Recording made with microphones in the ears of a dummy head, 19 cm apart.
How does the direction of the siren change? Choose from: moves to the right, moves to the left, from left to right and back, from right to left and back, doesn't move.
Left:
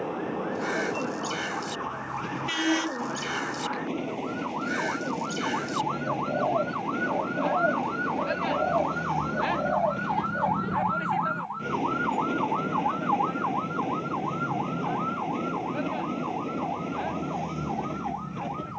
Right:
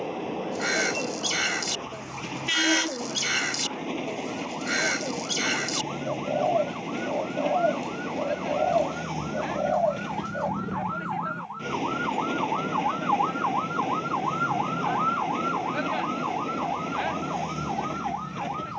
moves to the right.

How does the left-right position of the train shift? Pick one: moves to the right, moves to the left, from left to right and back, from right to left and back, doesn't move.
doesn't move.